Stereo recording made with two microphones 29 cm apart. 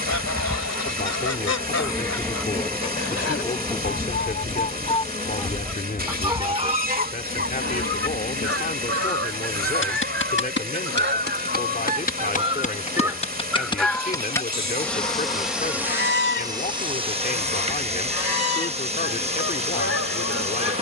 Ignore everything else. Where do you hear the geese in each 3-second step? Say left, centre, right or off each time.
left, left, right, right, centre, left, left.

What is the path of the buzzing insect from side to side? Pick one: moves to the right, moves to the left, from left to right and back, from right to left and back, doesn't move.
from right to left and back.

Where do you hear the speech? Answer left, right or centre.
left.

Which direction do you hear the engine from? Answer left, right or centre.
right.